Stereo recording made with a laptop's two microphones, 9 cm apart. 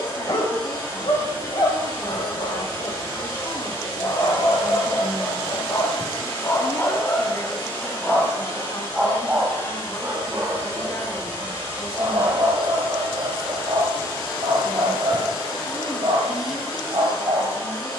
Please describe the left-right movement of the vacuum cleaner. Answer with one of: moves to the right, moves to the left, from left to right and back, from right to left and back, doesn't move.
doesn't move.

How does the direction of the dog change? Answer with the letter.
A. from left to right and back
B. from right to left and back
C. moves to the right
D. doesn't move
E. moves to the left
C.